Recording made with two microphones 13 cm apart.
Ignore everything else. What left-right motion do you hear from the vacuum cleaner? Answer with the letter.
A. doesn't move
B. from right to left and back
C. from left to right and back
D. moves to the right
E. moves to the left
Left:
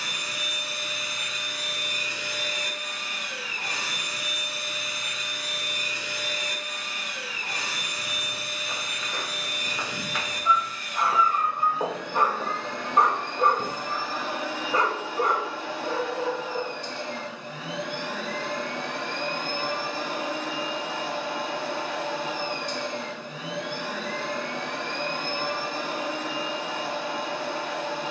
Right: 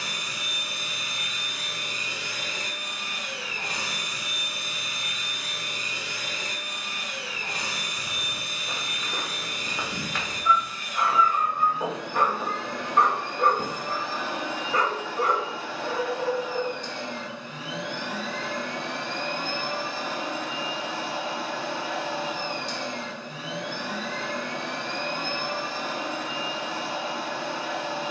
E.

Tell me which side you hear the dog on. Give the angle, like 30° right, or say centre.
20° left.